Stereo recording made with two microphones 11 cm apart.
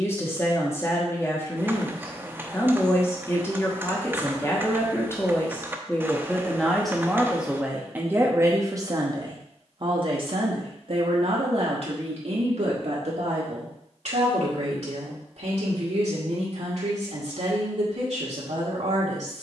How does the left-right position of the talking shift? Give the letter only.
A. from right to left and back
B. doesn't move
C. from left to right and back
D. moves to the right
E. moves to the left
D.